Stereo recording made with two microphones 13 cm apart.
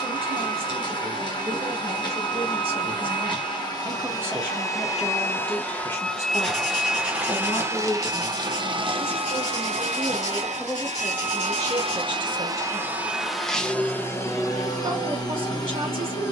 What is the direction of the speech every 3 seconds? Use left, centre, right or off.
right, centre, left, centre, right, right.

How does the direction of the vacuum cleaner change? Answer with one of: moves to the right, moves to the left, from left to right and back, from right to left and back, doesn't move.
from left to right and back.